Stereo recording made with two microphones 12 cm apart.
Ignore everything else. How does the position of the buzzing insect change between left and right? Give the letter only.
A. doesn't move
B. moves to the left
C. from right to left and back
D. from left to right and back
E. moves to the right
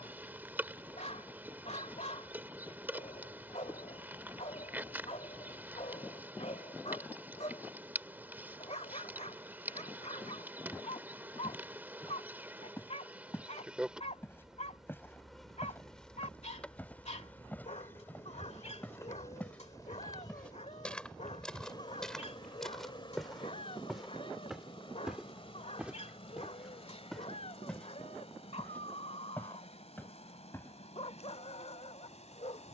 B.